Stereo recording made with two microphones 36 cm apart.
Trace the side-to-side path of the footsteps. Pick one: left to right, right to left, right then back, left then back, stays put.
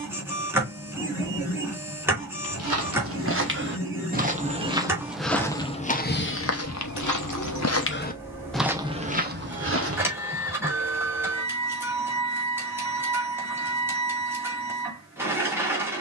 left then back.